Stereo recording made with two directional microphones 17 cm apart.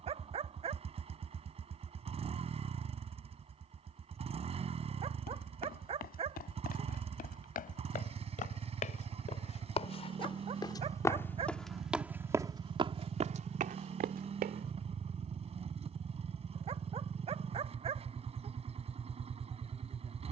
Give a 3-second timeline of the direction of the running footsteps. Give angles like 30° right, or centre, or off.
off, 60° left, 50° left, 20° left, 40° right, off, off.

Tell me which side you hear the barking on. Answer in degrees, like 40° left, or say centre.
40° right.